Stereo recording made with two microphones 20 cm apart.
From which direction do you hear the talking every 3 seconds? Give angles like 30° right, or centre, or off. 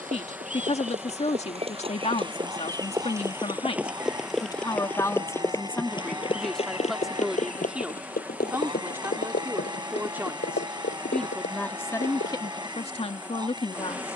30° left, 20° left, centre, centre, 30° left.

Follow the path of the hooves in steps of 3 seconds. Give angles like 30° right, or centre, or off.
30° right, centre, 40° left, 60° left, 70° left.